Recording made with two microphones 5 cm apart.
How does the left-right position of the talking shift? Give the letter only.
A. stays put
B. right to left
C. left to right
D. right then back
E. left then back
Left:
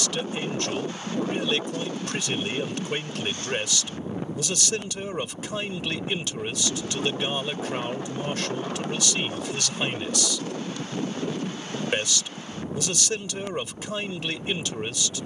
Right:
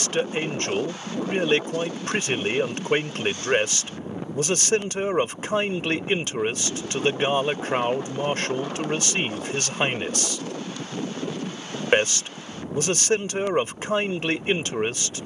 A.